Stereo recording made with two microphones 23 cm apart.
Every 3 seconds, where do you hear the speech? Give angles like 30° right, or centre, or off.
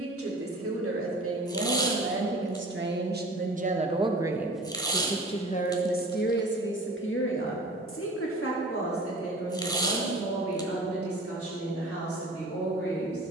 60° right, centre, 60° left, 70° left, 80° left.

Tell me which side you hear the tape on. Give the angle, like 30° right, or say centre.
20° left.